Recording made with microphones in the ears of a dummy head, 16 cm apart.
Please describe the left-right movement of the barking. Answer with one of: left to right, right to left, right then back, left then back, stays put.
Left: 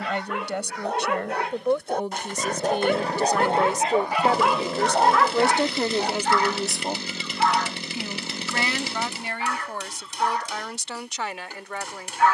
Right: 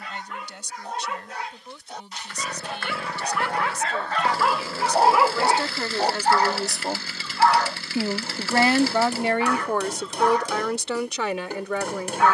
left to right.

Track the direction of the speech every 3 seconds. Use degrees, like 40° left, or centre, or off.
50° left, 30° left, 20° right, 60° right.